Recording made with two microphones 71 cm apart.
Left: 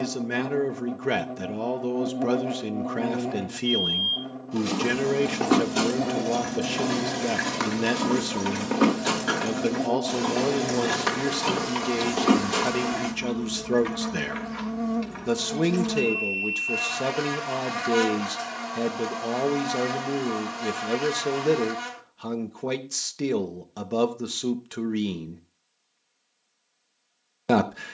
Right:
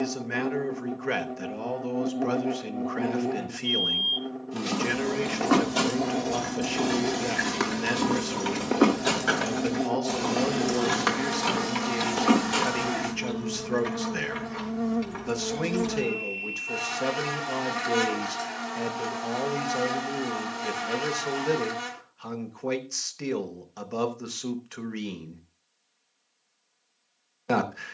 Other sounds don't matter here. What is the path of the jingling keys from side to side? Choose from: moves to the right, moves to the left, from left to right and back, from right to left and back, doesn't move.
moves to the right.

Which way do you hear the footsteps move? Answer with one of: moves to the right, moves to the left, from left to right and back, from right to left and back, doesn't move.
moves to the left.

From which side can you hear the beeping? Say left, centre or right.
left.